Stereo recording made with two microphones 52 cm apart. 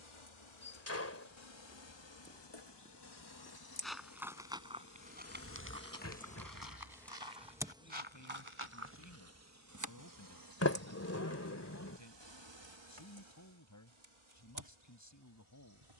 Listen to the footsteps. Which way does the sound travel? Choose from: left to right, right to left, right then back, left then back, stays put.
left to right.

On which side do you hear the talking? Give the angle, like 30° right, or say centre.
30° left.